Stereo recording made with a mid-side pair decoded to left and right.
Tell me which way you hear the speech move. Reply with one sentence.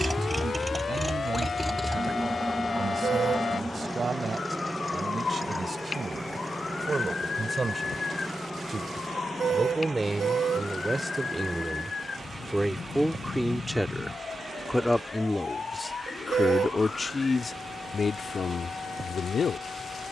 In this clip you hear the speech travel towards the left.